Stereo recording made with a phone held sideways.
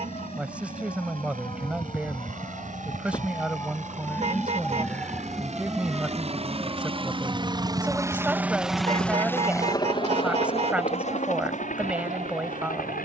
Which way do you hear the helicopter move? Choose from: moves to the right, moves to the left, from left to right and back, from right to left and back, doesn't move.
moves to the left.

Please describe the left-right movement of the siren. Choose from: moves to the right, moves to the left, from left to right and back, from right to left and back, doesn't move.
moves to the right.